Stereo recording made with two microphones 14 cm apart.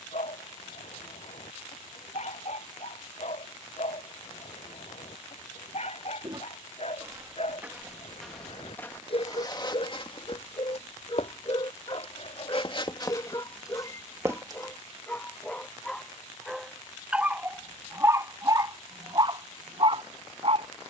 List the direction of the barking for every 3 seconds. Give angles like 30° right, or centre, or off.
60° left, 60° left, 50° left, 40° left, 30° left, centre, 30° right.